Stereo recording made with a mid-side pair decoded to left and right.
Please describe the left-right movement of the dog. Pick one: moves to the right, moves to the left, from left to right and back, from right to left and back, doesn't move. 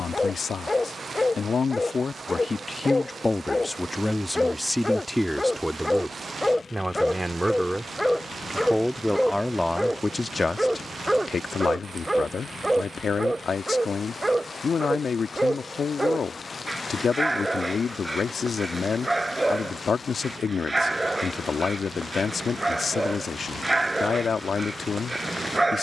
moves to the right.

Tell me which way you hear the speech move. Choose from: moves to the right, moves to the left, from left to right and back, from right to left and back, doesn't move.
from left to right and back.